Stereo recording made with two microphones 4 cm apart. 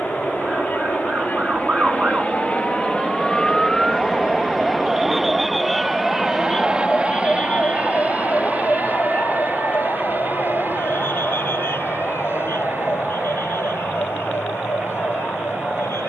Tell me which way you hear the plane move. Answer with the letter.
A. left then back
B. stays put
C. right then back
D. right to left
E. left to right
E.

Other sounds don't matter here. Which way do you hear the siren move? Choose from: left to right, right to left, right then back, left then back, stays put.
right to left.